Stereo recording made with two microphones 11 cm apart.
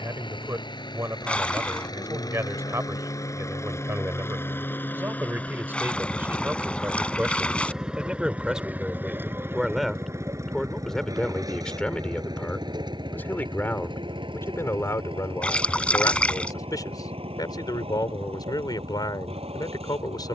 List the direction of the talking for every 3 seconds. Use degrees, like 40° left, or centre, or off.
30° right, 20° right, 10° right, centre, 20° left, 30° left, 40° left.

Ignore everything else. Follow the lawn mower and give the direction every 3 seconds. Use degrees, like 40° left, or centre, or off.
40° left, 20° left, centre, 30° right, 40° right, 50° right, 60° right.